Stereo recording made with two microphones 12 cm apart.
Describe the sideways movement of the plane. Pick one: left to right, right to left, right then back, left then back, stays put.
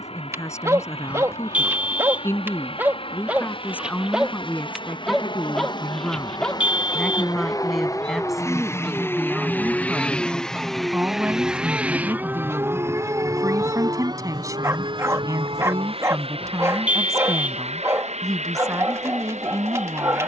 left to right.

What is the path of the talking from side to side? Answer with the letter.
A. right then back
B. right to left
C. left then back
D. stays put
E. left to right
E.